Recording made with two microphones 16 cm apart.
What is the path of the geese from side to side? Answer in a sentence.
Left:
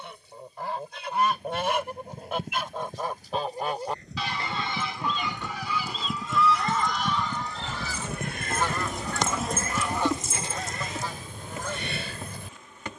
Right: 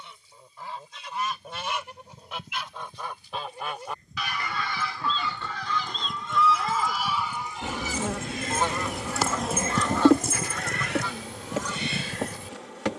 You can hear the geese go right and come back.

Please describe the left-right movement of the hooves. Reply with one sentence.
In this clip you hear the hooves move from left to right.